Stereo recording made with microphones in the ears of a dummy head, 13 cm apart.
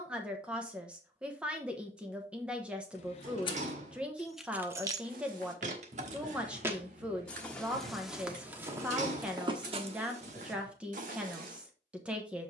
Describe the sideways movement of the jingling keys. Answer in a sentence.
In this clip you hear the jingling keys go from the left side to the right.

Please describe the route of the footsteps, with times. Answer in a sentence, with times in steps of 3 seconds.
In this clip you hear the footsteps not at all from 0 s, on the right from 3 s, in the centre from 6 s and on the right from 9 s.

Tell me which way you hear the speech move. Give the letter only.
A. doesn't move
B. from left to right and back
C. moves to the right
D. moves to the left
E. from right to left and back
A.